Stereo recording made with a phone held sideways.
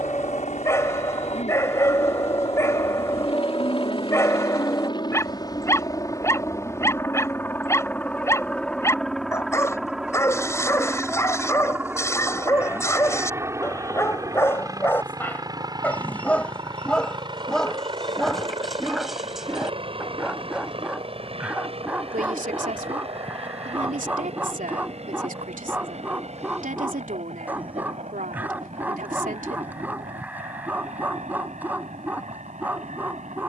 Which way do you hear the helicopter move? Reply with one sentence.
You can hear the helicopter move from left to right.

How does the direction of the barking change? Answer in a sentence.
You can hear the barking move to the right.